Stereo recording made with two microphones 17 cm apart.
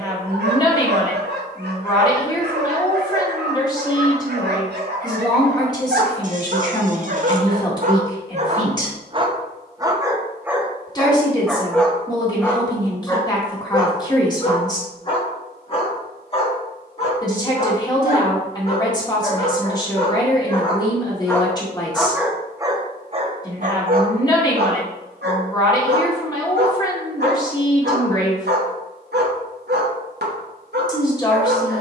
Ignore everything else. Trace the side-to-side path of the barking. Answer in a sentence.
In this clip you hear the barking move from right to left and back again.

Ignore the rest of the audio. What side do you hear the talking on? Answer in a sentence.
You can hear the talking on the left.